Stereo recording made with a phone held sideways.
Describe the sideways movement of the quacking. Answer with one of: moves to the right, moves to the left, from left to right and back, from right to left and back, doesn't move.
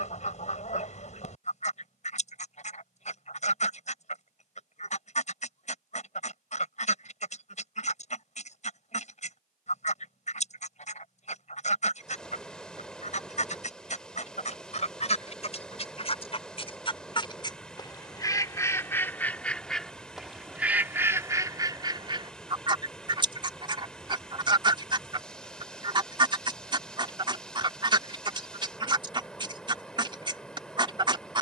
moves to the right.